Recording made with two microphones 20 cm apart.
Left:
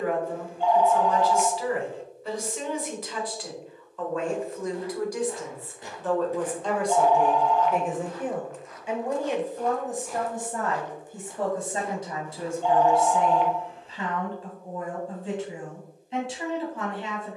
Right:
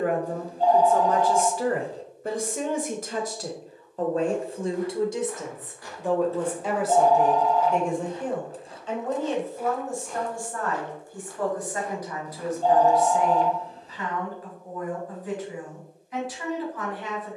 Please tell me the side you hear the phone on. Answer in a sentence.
You can hear the phone on the right.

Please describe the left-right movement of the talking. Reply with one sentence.
You can hear the talking go from the right side to the left.